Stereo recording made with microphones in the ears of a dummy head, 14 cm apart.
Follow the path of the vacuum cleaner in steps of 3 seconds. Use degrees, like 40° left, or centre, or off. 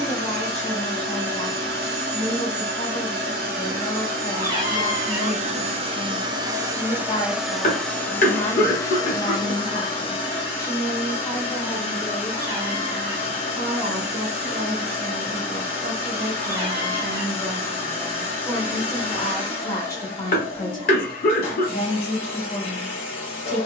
70° right, 50° right, centre, 30° left, 40° left, 40° left, 40° left, 40° left.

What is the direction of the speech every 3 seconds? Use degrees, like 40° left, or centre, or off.
40° left, 40° left, 40° left, 20° left, 20° right, 20° right, 20° left, 40° left.